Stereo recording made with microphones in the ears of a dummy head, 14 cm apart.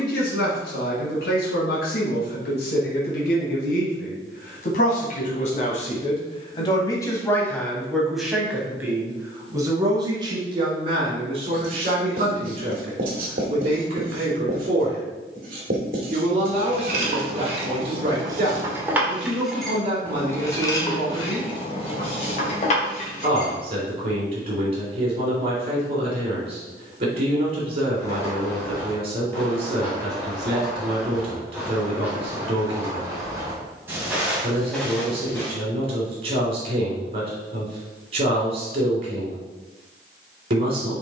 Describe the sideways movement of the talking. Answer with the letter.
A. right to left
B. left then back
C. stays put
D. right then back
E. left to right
E.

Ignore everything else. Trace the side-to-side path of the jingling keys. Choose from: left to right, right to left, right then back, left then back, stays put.
right to left.